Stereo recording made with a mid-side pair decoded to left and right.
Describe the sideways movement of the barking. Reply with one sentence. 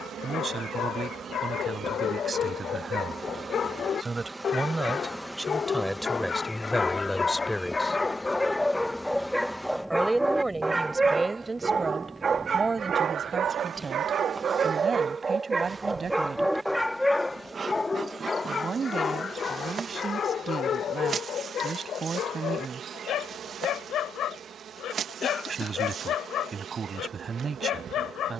You can hear the barking move from left to right and back again.